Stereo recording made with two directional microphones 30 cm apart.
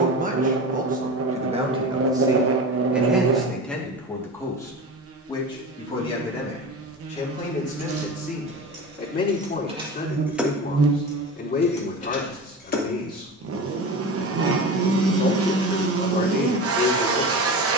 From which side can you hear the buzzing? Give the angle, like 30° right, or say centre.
50° right.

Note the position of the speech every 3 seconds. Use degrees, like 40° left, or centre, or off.
20° right, 10° left, 20° left, 30° left, 30° left, 30° left.